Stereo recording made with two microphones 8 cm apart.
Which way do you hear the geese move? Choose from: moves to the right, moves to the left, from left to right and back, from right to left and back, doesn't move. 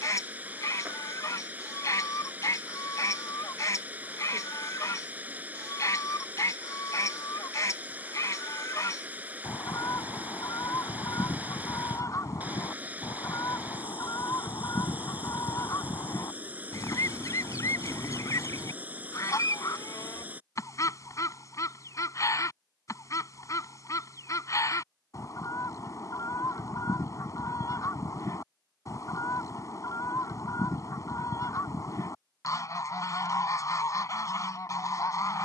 doesn't move.